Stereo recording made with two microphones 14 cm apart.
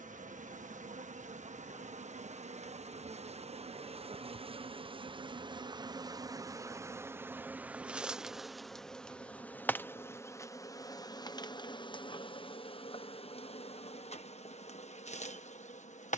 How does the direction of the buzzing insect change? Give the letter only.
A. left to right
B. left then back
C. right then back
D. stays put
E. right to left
E.